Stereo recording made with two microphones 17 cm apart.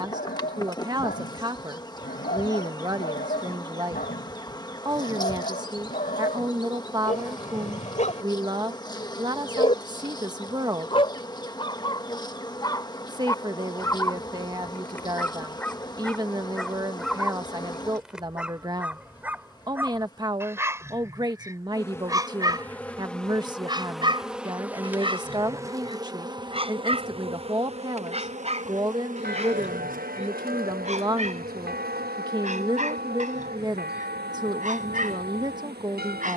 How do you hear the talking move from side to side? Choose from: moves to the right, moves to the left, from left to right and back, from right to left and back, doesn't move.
doesn't move.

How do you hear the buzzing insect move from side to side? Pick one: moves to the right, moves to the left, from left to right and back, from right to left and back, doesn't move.
moves to the right.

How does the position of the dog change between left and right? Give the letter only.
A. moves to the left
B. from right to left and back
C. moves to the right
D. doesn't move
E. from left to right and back
C.